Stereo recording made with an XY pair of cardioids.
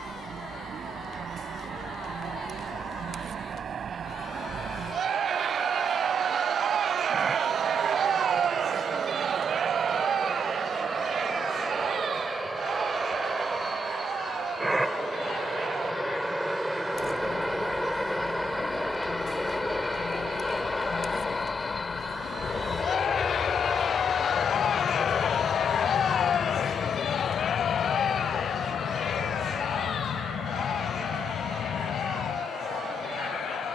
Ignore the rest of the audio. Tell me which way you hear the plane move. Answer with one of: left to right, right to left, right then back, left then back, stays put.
right to left.